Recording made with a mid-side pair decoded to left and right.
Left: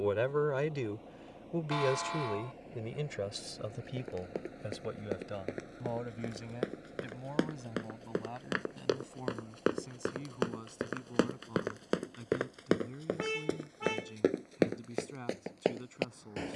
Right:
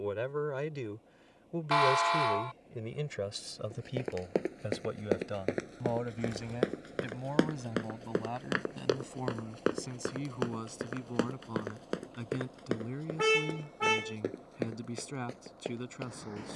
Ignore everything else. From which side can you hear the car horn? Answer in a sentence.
You can hear the car horn on the right.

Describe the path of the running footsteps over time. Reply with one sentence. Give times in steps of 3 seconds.
In this clip you hear the running footsteps not at all from 0 s, on the right from 3 s, in the centre from 9 s and on the left from 12 s.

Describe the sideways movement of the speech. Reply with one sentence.
You can hear the speech move to the right.